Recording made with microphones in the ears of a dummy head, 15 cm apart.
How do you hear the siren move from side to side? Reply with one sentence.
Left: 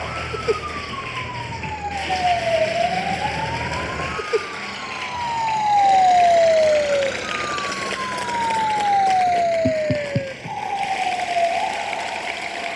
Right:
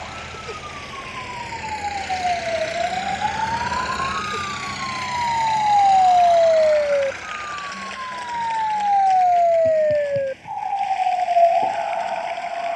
You can hear the siren go from the left side to the right.